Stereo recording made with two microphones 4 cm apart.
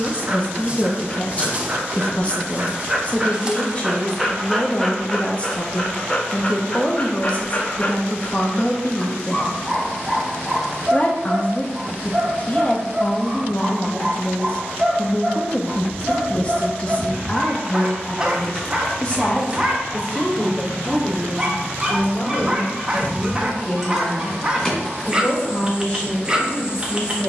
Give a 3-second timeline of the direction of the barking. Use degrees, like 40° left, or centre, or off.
30° right, centre, 30° left, 10° right, 20° right, 20° right, 20° right, 20° right, 20° right.